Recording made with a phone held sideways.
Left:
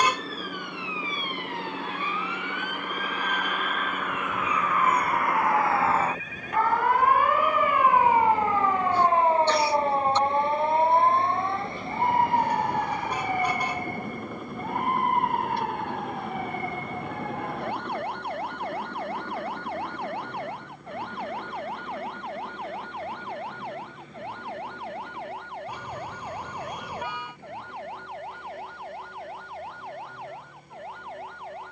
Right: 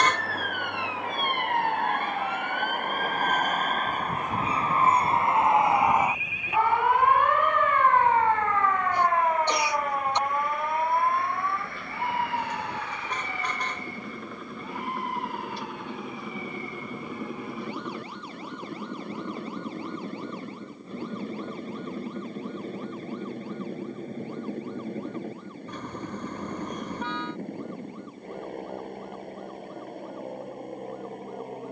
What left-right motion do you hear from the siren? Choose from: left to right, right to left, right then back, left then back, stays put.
right to left.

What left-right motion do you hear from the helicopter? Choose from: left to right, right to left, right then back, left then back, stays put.
left to right.